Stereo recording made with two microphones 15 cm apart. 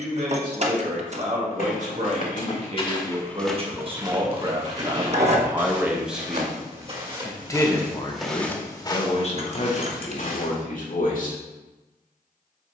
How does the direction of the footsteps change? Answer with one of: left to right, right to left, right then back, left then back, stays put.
right then back.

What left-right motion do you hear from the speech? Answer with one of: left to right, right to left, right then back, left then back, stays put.
right to left.